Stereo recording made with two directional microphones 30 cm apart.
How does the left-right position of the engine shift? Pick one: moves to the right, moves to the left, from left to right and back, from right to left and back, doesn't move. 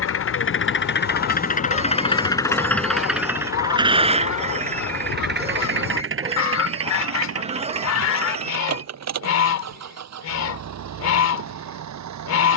moves to the right.